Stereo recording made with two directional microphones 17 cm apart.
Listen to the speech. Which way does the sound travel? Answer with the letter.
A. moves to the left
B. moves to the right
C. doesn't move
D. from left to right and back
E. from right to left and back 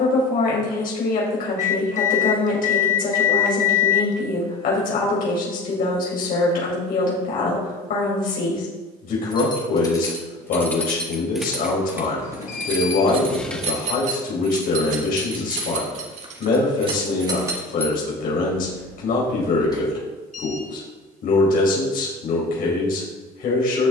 C.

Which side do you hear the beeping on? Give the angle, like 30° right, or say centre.
50° left.